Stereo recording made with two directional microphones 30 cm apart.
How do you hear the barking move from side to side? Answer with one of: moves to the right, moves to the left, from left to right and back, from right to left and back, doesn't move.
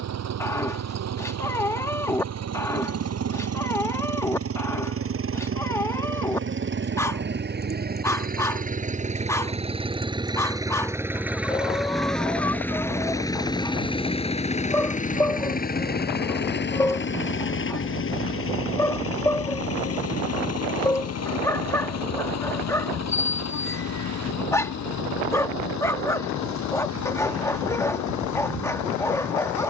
doesn't move.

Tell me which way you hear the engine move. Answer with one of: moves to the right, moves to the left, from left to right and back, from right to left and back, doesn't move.
moves to the left.